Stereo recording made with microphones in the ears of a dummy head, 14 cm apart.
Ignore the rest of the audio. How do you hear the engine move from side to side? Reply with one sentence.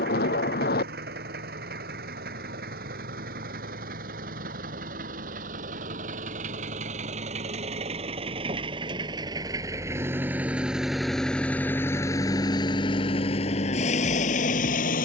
You can hear the engine go from the right side to the left.